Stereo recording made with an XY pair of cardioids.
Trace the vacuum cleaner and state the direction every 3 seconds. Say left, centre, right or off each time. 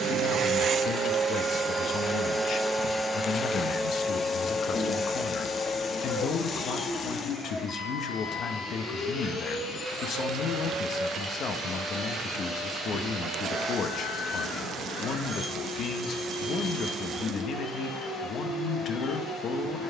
right, left, left, left, left, left, left.